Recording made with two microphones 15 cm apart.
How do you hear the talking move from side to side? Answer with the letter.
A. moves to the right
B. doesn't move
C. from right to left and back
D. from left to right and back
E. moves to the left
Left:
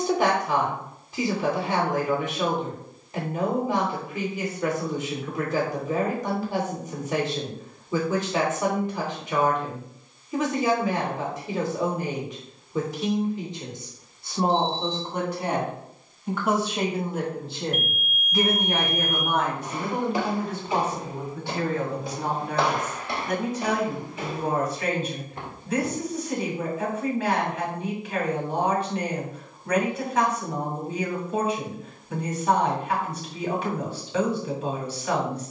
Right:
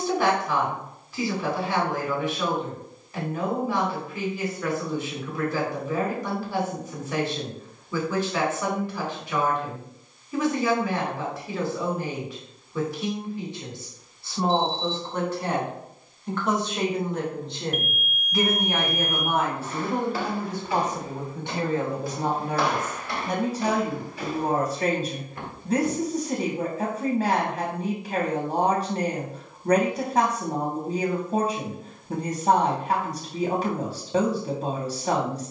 A.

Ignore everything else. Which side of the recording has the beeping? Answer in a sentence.
You can hear the beeping on the left.